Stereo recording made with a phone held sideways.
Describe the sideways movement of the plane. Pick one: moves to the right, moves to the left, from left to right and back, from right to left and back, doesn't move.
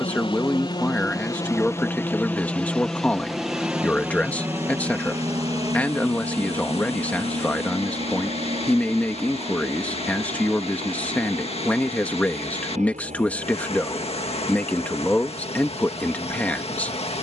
moves to the right.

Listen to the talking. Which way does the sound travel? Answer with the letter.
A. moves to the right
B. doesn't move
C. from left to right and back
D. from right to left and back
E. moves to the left
B.